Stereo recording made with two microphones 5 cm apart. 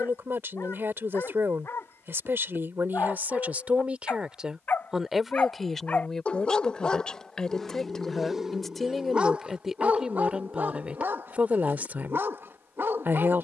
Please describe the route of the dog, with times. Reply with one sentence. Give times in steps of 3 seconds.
You can hear the dog on the left from 0 s, in the centre from 6 s and on the right from 9 s.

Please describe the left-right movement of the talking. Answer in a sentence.
In this clip you hear the talking go left and come back.